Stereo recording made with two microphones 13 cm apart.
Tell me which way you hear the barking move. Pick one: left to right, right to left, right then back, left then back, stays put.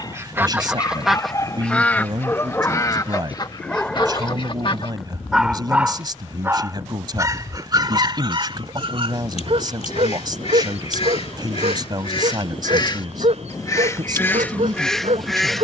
left to right.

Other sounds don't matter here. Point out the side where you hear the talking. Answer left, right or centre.
right.